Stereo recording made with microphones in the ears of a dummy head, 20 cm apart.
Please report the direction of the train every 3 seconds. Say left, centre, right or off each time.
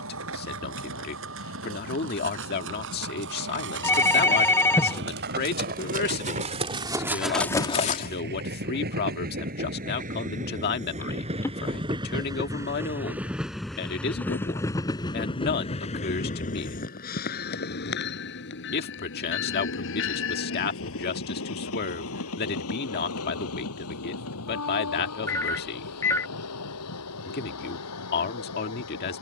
right, right, right, right, centre, left, left, left, left, left.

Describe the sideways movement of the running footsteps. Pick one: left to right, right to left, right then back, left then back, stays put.
right to left.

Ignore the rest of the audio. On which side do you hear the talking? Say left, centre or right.
left.